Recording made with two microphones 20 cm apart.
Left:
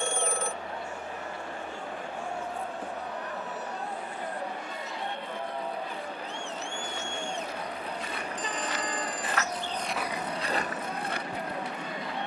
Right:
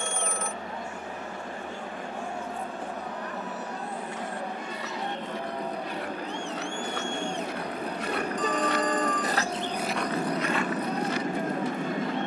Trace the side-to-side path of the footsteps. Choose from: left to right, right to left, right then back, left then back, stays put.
right to left.